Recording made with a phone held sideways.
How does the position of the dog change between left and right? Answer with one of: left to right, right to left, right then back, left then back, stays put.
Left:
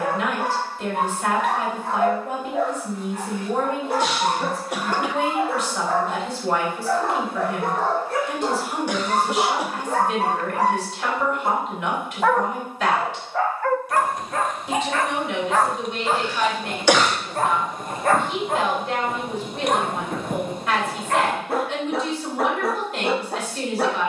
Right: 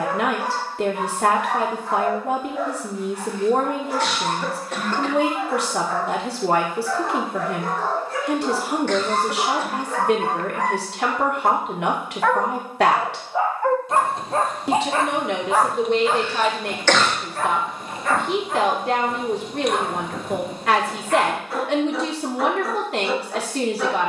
right then back.